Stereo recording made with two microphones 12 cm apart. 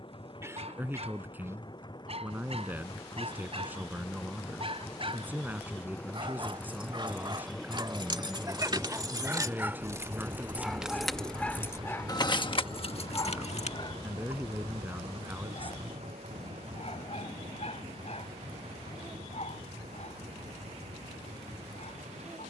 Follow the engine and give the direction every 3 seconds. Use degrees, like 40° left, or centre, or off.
40° left, 30° left, centre, 30° right, 50° right, 70° right, 80° right, 80° right.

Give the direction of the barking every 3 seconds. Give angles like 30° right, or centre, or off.
70° right, 60° right, 40° right, centre, 40° left, 60° left, 70° left, 80° left.